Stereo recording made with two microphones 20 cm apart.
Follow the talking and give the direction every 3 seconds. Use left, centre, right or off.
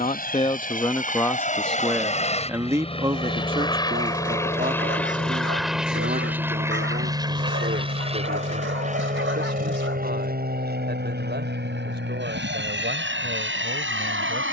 centre, right, right, right, right.